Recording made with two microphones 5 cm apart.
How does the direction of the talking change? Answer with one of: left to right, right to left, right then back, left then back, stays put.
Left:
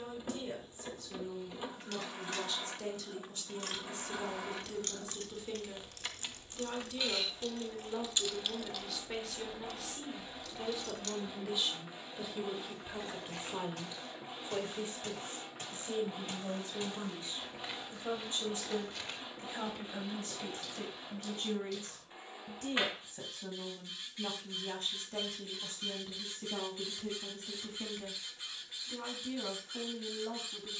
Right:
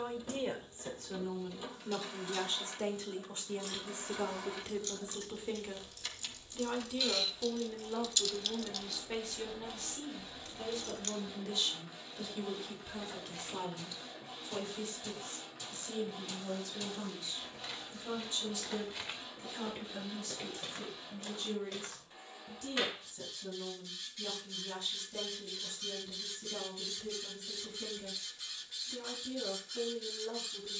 right to left.